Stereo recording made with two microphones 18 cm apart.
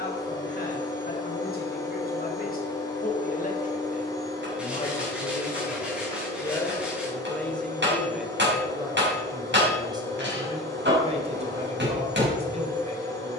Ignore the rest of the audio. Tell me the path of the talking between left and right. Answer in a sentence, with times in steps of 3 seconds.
In this clip you hear the talking on the left from 0 s, in the centre from 6 s and on the right from 9 s.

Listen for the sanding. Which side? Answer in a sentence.
You can hear the sanding in the centre.